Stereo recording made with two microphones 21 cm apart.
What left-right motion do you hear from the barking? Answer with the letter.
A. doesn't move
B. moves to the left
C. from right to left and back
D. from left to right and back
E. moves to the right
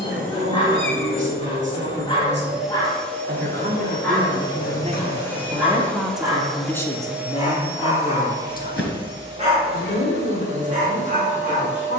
E.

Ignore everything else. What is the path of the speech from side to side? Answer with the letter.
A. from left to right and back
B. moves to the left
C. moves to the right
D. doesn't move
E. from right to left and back
B.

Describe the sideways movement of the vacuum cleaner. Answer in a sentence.
In this clip you hear the vacuum cleaner move from right to left and back again.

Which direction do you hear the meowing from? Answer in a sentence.
You can hear the meowing on the left.